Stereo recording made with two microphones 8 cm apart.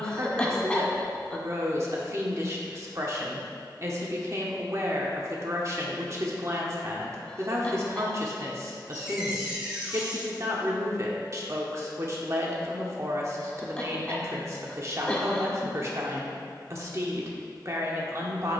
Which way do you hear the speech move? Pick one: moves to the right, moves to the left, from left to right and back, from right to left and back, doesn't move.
doesn't move.